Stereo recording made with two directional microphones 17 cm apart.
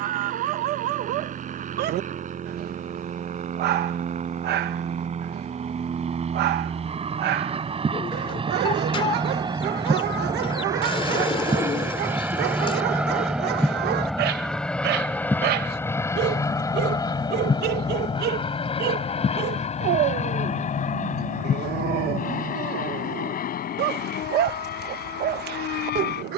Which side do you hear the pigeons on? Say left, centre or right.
left.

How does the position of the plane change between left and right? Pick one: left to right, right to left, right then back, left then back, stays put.
right to left.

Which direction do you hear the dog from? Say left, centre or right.
right.